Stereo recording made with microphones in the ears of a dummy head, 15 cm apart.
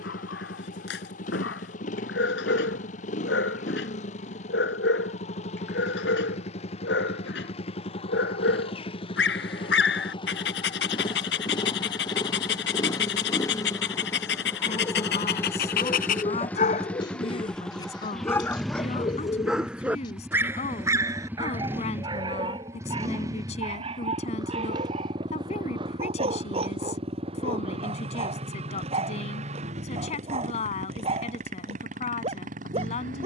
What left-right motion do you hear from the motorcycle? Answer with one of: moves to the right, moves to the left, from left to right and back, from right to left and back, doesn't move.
moves to the right.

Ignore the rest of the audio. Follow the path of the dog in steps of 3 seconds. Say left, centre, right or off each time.
left, left, left, left, left, left, centre, right, right, right, right.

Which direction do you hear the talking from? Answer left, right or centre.
left.